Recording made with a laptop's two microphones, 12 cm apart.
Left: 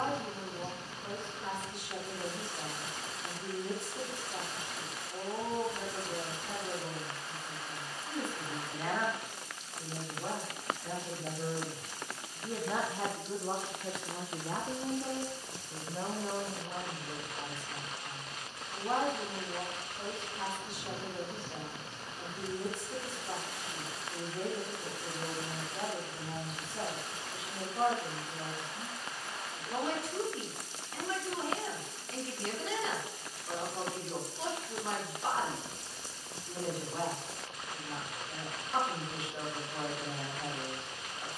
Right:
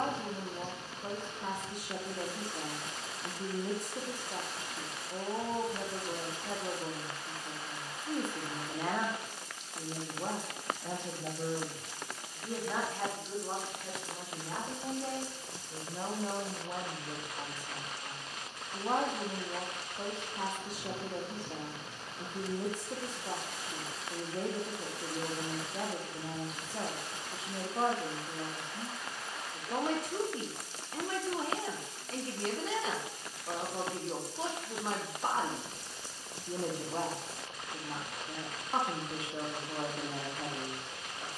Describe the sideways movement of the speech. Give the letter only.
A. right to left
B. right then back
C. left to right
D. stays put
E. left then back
E.